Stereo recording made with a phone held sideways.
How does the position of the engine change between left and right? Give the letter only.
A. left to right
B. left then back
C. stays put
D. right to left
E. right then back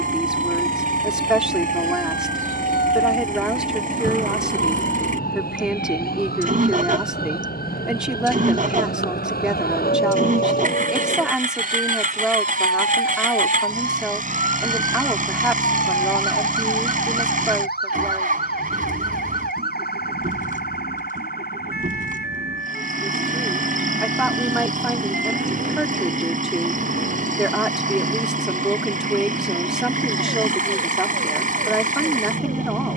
C.